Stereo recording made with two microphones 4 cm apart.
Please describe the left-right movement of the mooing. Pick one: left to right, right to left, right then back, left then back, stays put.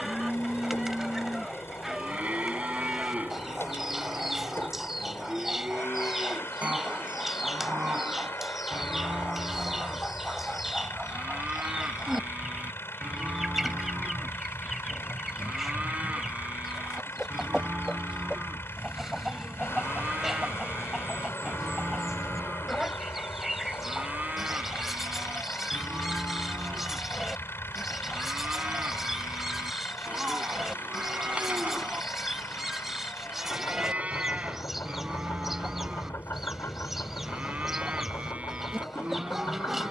stays put.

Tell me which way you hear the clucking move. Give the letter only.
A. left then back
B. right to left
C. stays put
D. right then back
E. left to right
C.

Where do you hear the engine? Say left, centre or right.
left.